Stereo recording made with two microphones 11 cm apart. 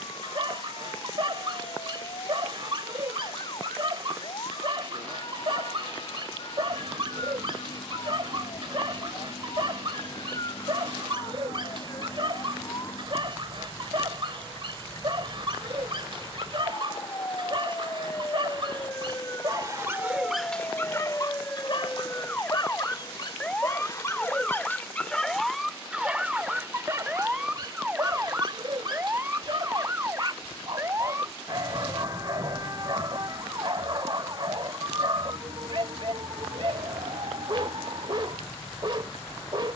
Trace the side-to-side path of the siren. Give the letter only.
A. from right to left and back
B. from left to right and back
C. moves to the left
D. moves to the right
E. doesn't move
D.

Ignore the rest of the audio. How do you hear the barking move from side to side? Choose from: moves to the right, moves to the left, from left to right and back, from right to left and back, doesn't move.
from right to left and back.